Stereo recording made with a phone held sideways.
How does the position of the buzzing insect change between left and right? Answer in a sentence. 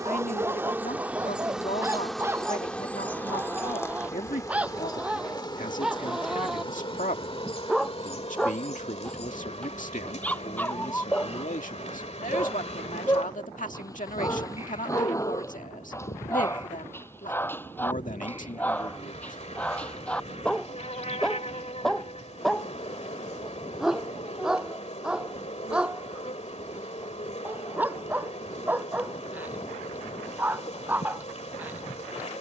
You can hear the buzzing insect move from right to left.